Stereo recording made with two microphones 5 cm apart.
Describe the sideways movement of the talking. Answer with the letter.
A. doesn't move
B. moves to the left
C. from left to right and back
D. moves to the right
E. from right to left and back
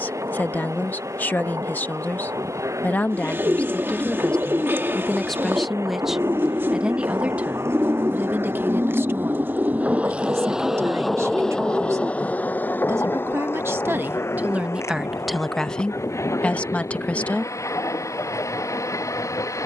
C.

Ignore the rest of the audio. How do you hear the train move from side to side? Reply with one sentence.
In this clip you hear the train move from right to left.